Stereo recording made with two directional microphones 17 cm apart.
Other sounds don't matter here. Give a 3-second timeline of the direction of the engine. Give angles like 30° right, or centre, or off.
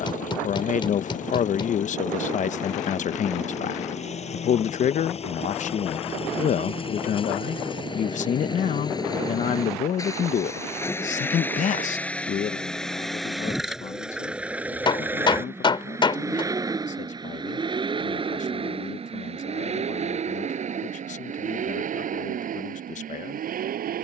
40° left, 40° left, 30° left, 20° left, centre, 20° right, 40° right, 50° right.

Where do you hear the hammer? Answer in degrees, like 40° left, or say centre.
30° left.